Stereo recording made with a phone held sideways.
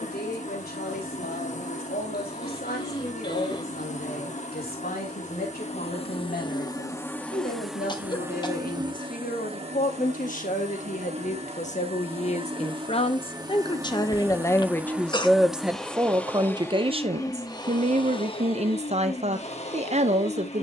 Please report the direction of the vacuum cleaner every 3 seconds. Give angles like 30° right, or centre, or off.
50° left, 40° left, centre, 40° right, 20° right, 10° left, 40° left.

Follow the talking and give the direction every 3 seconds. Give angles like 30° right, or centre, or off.
70° left, 60° left, 60° left, 50° left, 30° left, 20° right, 40° right.